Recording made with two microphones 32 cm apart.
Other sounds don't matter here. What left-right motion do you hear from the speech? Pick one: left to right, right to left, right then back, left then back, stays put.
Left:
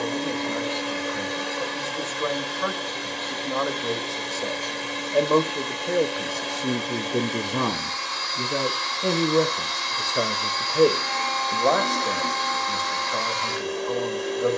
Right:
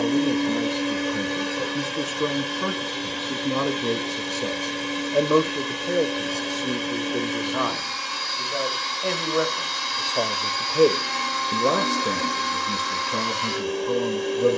left then back.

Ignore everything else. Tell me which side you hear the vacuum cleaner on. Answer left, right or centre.
right.